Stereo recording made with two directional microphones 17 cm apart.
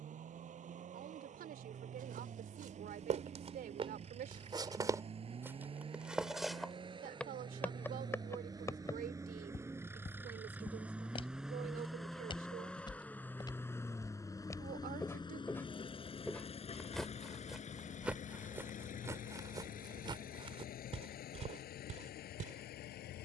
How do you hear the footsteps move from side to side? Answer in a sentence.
You can hear the footsteps go left and come back.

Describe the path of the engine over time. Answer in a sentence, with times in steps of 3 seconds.
You can hear the engine on the right from 0 s, in the centre from 9 s and on the left from 15 s.